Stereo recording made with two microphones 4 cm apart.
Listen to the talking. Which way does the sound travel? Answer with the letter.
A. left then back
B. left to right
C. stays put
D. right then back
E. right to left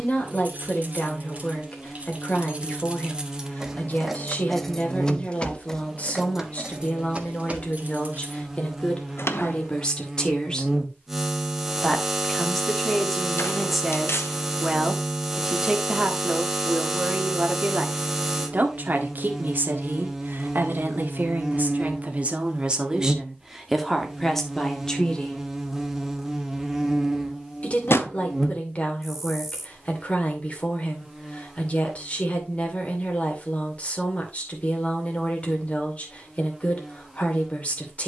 D.